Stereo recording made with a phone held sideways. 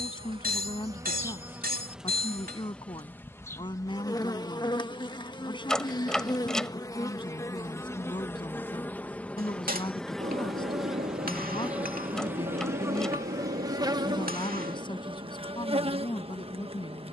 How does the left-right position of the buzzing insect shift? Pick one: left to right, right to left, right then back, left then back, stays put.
left then back.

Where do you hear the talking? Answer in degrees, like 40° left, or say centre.
30° left.